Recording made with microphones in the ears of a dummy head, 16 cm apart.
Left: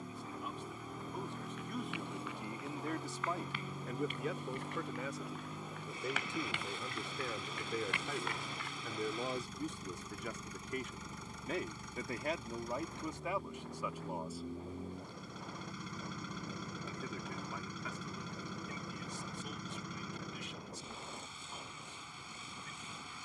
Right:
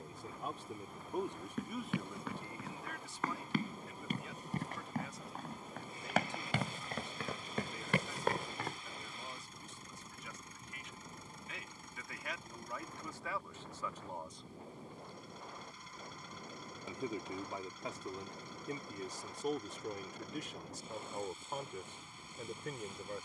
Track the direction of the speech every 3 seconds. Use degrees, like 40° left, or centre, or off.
10° right, 50° left, 60° left, 40° left, 20° left, 20° right, 40° right, 50° right.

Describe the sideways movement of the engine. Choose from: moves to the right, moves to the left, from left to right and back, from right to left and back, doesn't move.
doesn't move.